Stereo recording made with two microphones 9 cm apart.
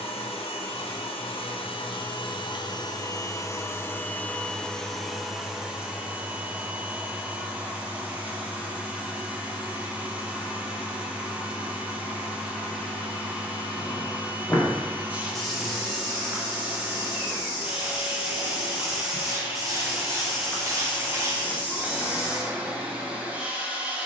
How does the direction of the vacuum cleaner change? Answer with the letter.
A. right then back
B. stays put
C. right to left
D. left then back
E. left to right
E.